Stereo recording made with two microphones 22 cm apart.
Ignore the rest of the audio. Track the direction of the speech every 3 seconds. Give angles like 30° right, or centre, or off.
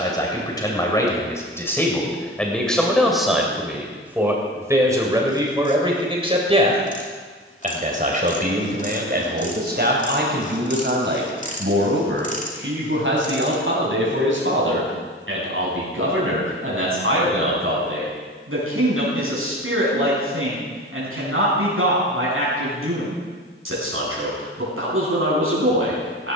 10° left, 10° right, 30° right, 50° right, 60° right, 70° right, 70° right, 70° right, 70° right.